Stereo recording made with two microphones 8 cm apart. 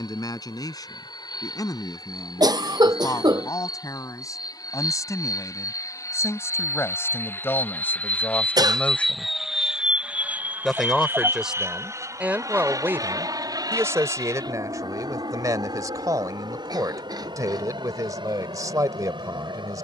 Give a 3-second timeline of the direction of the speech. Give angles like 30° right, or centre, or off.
50° left, 40° left, 30° left, centre, 30° right, 50° right, 50° right.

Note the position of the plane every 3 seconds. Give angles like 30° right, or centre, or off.
70° left, 60° left, 30° left, 20° right, 50° right, 60° right, 70° right.